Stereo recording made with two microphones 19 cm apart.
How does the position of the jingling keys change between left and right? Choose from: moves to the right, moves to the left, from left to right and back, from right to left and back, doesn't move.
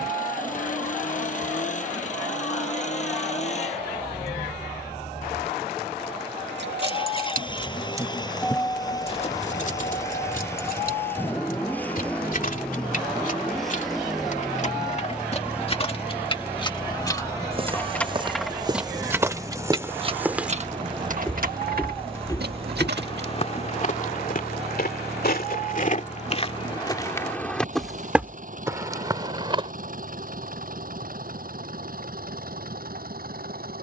from right to left and back.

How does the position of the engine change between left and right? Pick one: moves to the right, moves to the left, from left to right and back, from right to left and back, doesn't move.
moves to the right.